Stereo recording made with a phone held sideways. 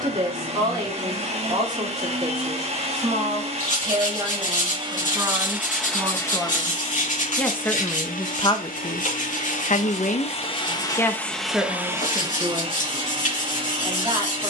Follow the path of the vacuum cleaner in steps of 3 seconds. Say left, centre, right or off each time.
right, right, left, left, right.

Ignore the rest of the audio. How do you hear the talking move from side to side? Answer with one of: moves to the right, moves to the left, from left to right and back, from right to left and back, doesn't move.
from right to left and back.